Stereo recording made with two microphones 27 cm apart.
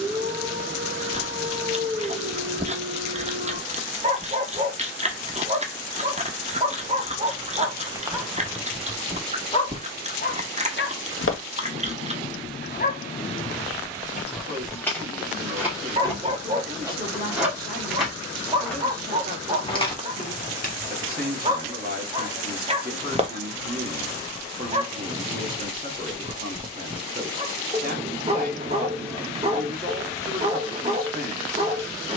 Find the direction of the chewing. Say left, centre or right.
right.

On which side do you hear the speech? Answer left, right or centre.
right.